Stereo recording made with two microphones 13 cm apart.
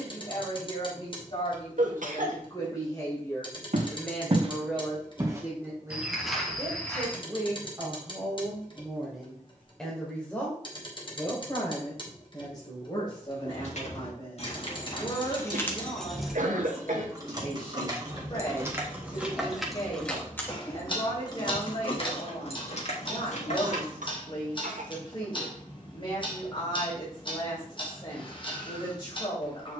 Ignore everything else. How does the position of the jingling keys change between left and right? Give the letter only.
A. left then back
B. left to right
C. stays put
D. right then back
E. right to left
D.